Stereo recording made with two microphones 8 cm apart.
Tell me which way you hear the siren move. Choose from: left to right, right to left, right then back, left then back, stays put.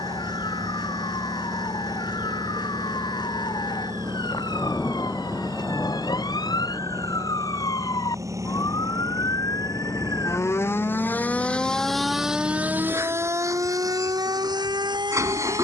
left to right.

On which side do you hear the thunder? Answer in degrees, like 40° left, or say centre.
20° left.